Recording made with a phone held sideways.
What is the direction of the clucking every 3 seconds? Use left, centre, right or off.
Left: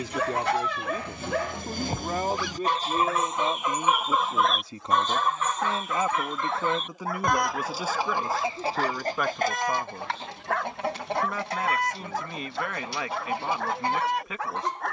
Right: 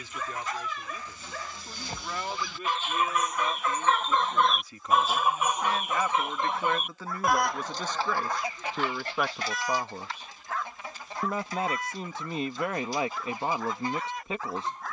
left, centre, centre, left, left.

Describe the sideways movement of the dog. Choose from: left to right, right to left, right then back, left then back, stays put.
stays put.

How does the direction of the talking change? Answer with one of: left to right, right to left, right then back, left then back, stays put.
left to right.